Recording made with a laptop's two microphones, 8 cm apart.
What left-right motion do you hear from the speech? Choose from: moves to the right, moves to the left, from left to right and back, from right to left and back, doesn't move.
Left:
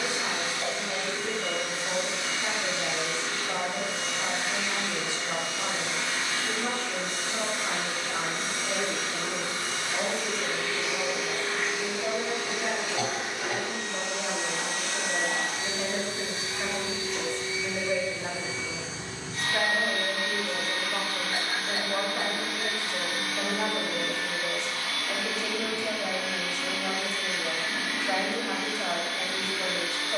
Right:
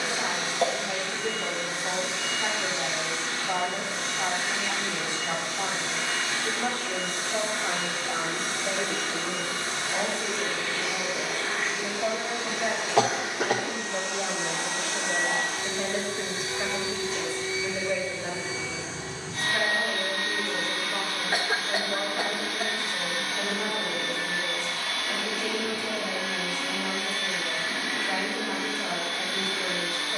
moves to the left.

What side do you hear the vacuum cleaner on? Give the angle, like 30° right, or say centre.
30° right.